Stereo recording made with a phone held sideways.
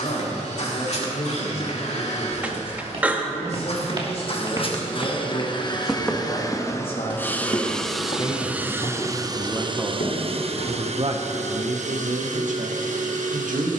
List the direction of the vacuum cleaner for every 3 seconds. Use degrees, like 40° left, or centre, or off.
60° left, 40° left, 10° left, 50° right, 70° right.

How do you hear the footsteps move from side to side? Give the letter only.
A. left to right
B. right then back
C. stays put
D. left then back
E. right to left
E.